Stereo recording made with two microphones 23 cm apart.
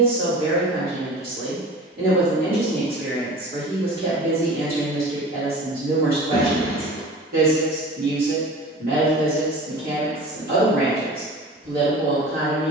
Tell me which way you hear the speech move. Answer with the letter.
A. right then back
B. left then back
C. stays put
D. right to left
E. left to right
C.